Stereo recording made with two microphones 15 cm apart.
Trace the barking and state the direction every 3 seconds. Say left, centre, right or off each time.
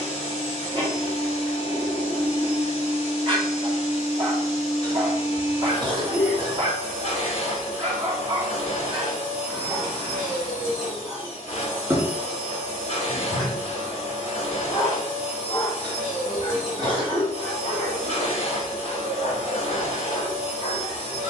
right, right, right, right, centre, left, left.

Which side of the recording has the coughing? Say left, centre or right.
right.